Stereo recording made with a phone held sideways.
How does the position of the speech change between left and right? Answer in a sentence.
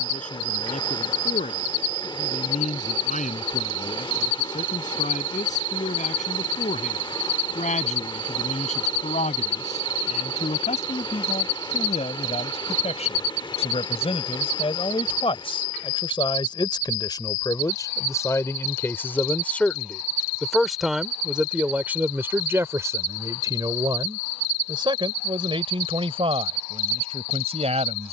In this clip you hear the speech move from left to right.